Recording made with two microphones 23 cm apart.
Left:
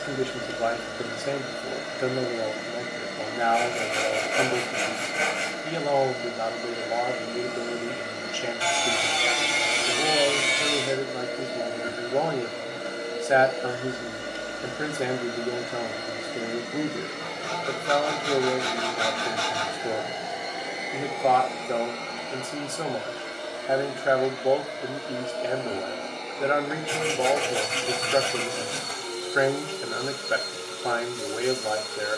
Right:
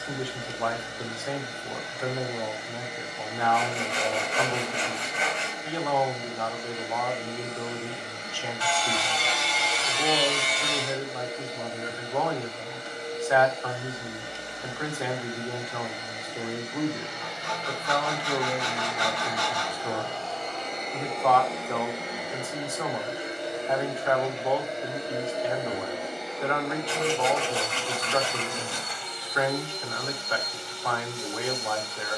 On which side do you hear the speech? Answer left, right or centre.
left.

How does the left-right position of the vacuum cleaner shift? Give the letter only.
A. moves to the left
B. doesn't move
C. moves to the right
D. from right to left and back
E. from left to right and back
E.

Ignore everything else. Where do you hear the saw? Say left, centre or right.
left.